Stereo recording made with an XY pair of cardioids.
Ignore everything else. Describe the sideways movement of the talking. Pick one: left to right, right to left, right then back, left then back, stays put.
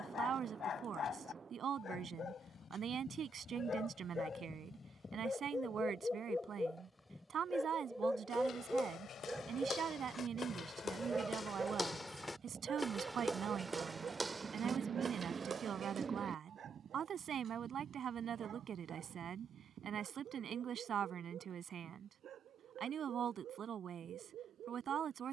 stays put.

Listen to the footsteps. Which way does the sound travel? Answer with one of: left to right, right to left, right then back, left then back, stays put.
left to right.